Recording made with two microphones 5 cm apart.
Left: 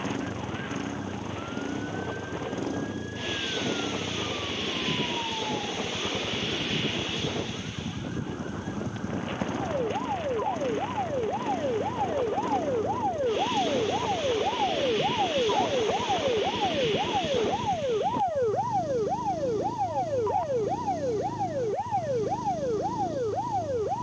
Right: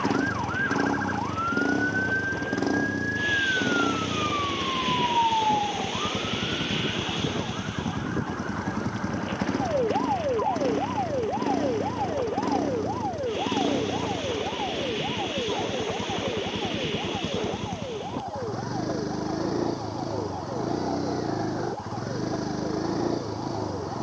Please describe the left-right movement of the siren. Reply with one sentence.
In this clip you hear the siren travel towards the left.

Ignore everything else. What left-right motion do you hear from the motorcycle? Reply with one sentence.
In this clip you hear the motorcycle stay in one place.